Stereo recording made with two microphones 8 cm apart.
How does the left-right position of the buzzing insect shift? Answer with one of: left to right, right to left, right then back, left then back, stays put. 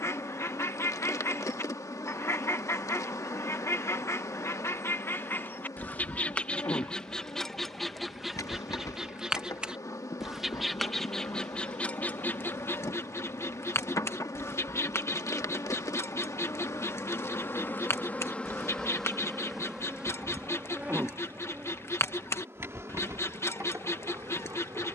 left to right.